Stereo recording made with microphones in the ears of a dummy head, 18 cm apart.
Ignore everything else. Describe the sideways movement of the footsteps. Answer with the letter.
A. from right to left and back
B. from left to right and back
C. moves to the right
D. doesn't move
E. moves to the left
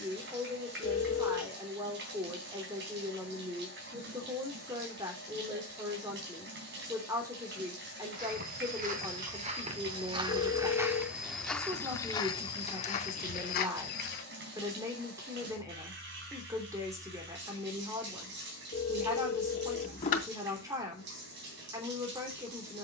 E.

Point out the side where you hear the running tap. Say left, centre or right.
right.